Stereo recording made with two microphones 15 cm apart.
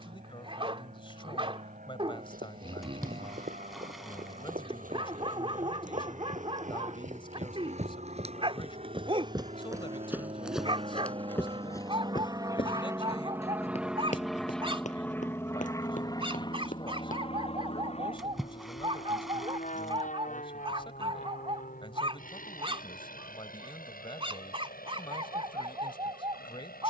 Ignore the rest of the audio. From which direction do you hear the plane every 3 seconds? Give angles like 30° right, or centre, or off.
70° right, 70° right, 60° right, 40° right, 10° right, 30° left, 50° left, 60° left, 70° left.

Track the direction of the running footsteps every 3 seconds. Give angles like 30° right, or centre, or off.
80° right, 70° right, 50° right, 10° right, 40° left, 60° left, off, off, off.